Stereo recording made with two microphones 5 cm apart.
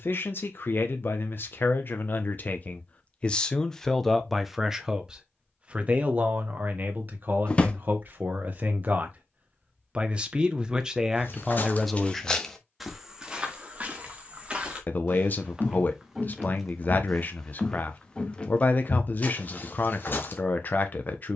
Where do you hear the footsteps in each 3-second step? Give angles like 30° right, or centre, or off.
off, off, off, 40° left, 10° right, centre, 40° left.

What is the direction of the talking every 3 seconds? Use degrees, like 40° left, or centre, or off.
50° left, centre, 40° right, 20° right, 10° left, 40° left, 40° left.